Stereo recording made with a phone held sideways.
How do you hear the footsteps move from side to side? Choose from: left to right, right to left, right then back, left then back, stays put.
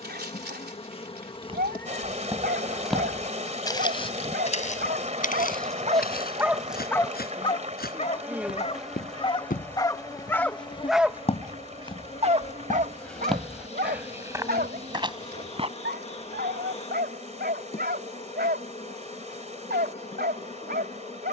left then back.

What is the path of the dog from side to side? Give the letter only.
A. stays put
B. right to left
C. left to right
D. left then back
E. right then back
D.